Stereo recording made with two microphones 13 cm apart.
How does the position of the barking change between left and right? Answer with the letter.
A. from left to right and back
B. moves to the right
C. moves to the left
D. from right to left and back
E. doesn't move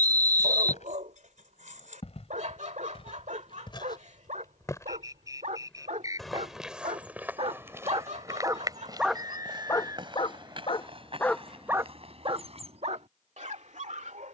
D.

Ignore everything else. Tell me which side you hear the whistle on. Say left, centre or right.
right.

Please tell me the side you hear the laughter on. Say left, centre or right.
right.